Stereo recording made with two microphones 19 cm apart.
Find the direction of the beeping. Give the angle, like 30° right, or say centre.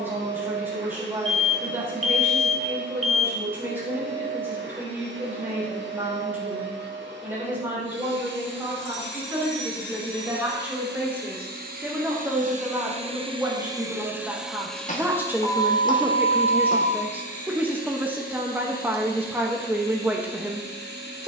40° left.